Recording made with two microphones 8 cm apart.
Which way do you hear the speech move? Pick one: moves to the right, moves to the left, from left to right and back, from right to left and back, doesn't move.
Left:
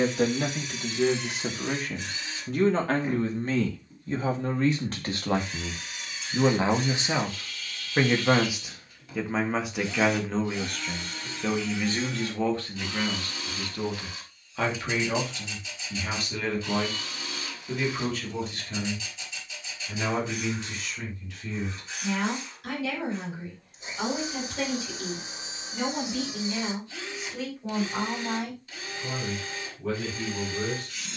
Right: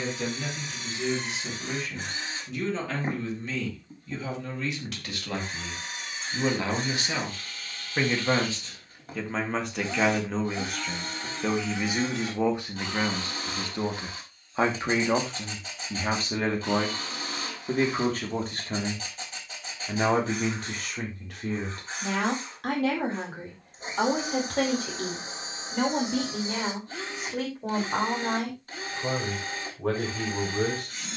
moves to the right.